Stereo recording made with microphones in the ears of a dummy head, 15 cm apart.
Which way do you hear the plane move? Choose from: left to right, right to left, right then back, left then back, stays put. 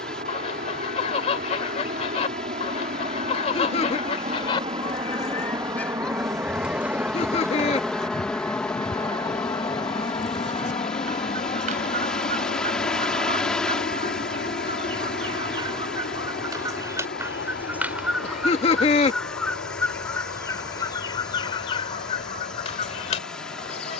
right to left.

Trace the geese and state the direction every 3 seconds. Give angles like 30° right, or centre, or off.
40° left, 30° left, 20° right, 50° right, 40° right, 20° right, 10° left, 30° left.